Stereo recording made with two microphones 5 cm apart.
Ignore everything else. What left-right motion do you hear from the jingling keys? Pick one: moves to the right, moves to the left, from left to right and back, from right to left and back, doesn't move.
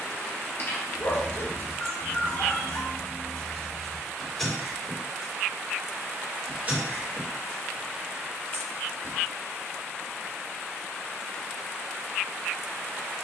moves to the right.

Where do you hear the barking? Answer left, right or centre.
left.